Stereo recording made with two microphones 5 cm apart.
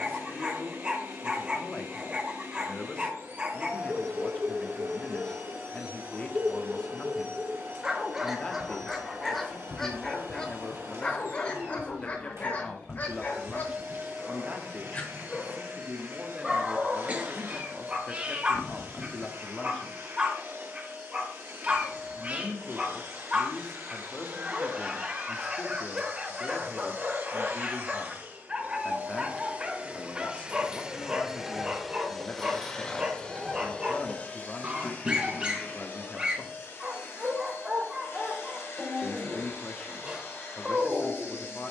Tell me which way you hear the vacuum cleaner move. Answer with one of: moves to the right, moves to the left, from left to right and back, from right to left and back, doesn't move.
moves to the left.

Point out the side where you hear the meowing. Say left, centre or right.
right.